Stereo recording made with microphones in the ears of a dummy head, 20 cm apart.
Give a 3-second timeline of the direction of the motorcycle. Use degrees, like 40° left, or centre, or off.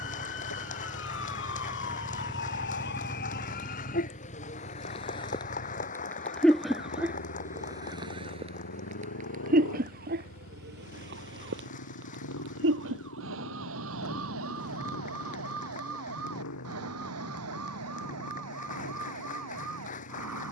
10° right, 30° left, 60° left, 70° left, 70° left, 70° left, 80° left.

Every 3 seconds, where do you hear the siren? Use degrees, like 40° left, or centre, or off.
60° left, 30° left, 10° right, 40° right, 60° right, 70° right, 70° right.